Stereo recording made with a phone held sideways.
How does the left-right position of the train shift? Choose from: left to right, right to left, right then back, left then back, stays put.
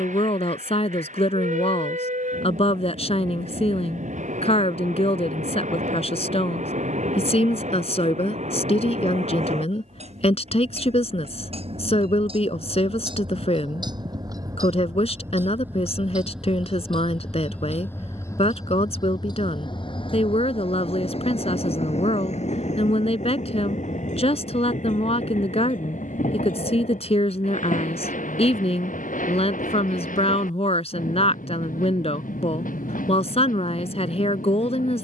right to left.